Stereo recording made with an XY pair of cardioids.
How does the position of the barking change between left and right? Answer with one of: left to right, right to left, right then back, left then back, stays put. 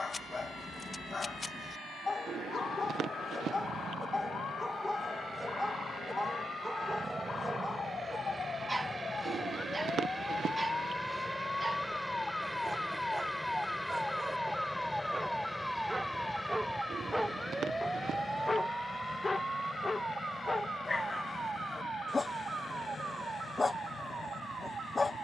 right then back.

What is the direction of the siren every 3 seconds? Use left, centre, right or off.
left, left, left, left, centre, centre, right, right, right.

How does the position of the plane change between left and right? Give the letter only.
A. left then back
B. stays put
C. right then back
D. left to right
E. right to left
E.